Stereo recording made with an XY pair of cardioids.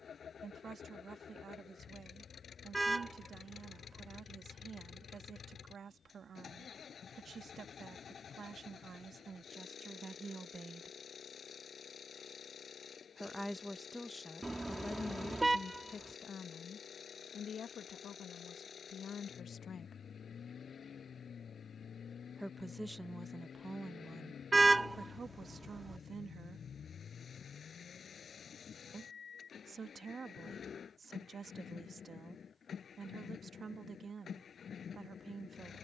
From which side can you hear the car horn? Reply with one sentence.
You can hear the car horn in the centre.